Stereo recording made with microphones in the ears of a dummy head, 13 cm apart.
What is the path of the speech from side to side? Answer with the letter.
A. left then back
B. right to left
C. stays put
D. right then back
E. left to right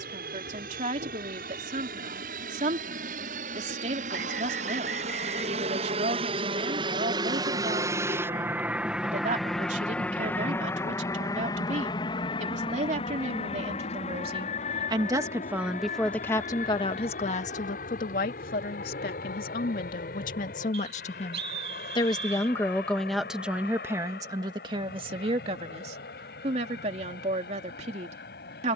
A.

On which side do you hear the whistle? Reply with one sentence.
In this clip you hear the whistle on the right.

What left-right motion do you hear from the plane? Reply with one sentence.
You can hear the plane travel towards the left.